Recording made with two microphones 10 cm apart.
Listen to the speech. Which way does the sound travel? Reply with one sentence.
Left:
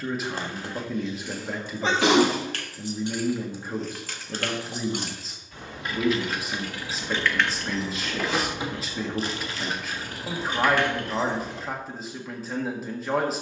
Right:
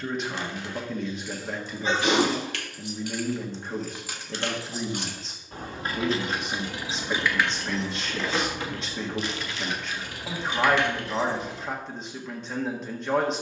You can hear the speech stay put.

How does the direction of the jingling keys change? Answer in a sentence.
In this clip you hear the jingling keys move from left to right and back again.